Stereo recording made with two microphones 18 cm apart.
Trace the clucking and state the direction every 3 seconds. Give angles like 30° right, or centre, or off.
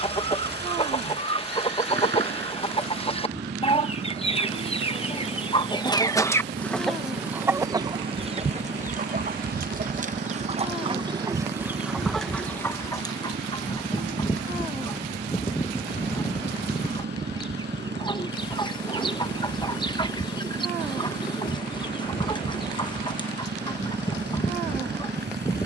30° left, 30° left, 10° right, 30° right, 20° left, 20° left, 20° left, 20° left, 20° left.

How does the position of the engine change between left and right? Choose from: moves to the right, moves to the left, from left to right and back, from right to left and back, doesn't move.
doesn't move.